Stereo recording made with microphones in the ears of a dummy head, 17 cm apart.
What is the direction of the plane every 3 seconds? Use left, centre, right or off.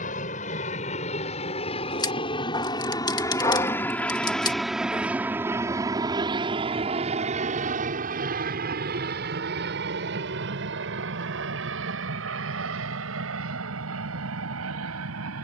left, centre, right, right, right.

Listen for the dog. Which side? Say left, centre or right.
left.